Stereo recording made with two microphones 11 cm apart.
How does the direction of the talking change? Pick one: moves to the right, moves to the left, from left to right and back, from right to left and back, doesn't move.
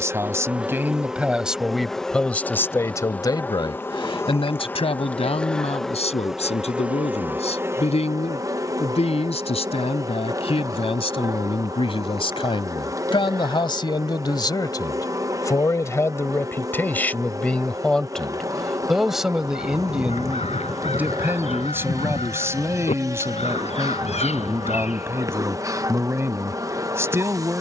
from right to left and back.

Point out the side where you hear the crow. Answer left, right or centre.
left.